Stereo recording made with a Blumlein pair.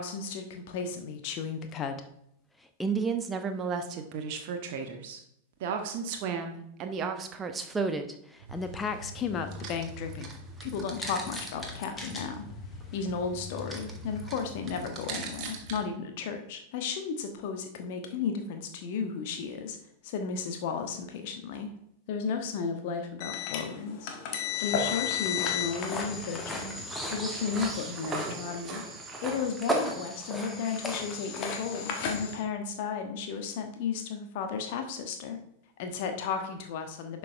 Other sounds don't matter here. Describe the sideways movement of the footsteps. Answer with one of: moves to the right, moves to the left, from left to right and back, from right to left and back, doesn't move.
from left to right and back.